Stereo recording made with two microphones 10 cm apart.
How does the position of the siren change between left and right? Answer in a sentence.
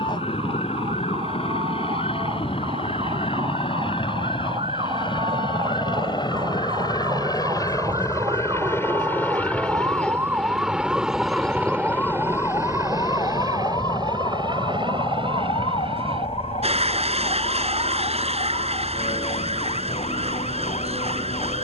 In this clip you hear the siren travel towards the left.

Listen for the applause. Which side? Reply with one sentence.
You can hear the applause on the right.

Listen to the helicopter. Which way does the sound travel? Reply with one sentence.
In this clip you hear the helicopter go from the left side to the right.